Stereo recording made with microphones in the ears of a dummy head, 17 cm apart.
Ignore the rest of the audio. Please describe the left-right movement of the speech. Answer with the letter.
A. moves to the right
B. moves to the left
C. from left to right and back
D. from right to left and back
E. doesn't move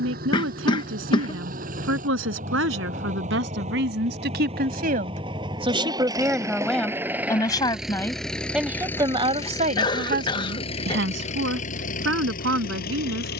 D.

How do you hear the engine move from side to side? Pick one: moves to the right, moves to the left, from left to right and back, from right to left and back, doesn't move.
moves to the left.